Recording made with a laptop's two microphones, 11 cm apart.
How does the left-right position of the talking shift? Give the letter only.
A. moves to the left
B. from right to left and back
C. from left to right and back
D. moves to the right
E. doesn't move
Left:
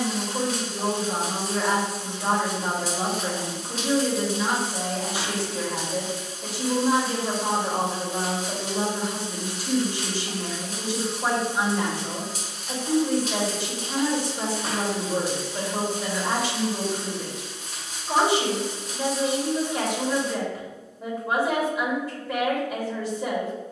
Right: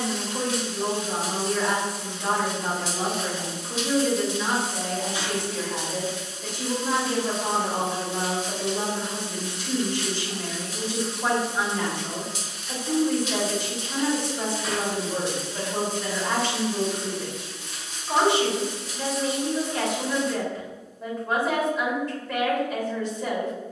E.